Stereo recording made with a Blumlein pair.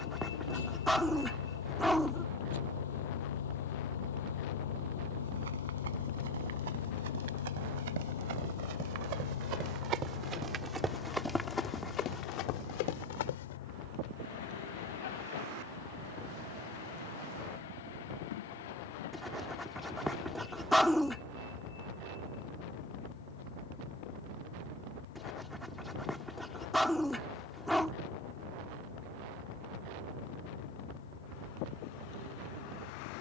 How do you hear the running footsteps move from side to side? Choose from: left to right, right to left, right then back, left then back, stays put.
right to left.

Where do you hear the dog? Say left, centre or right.
centre.